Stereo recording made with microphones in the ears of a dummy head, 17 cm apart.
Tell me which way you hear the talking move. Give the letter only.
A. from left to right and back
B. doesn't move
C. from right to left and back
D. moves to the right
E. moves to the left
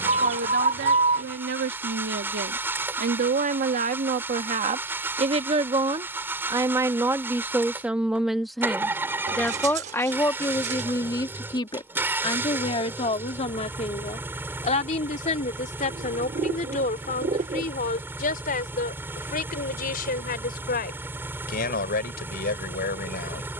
E.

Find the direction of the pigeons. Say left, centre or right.
right.